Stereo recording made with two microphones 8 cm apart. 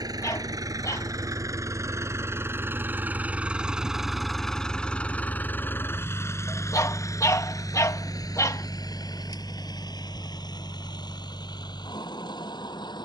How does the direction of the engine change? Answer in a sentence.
You can hear the engine move to the left.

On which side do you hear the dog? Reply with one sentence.
In this clip you hear the dog on the left.